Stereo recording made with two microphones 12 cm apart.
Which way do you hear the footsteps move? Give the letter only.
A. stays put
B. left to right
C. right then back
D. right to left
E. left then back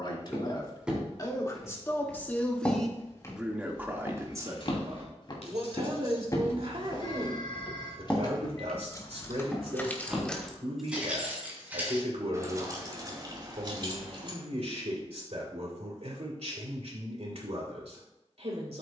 E.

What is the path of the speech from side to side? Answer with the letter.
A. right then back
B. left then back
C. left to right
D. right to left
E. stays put
C.